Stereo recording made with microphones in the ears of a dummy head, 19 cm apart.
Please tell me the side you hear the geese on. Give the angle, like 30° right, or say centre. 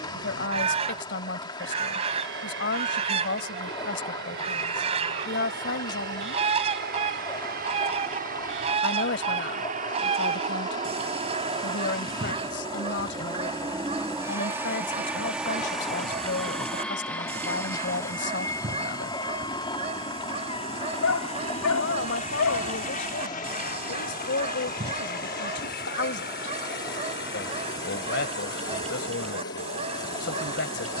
30° right.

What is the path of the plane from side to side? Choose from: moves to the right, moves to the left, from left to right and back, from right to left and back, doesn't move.
moves to the left.